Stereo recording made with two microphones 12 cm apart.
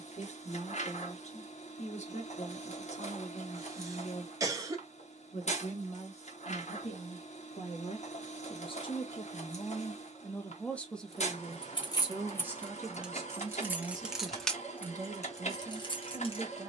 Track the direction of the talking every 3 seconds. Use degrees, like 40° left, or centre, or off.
70° left, 70° left, 60° left, 20° left, 20° right, 30° right.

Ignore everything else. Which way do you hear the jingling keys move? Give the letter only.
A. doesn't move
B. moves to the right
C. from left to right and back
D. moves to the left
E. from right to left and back
C.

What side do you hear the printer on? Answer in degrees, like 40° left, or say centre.
80° left.